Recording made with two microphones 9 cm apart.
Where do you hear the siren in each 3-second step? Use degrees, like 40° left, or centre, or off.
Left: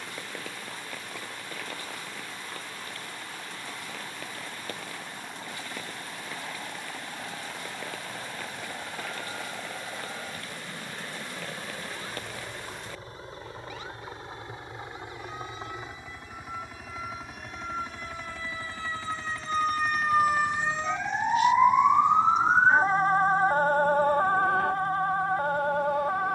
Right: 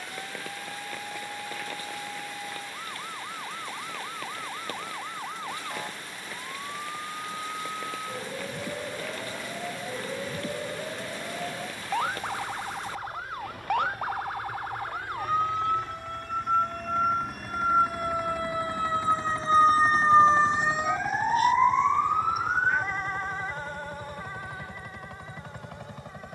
80° right, 80° right, 80° right, 70° right, 70° right, 60° right, 40° right, 30° left, 70° left.